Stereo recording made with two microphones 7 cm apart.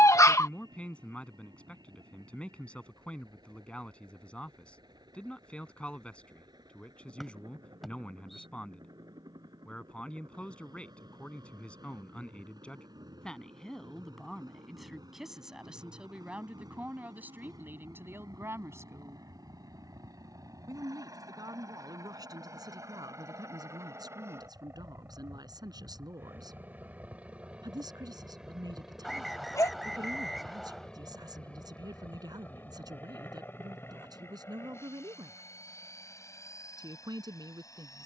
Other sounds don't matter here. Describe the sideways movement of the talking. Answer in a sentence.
You can hear the talking travel towards the right.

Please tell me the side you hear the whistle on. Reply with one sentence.
In this clip you hear the whistle in the centre.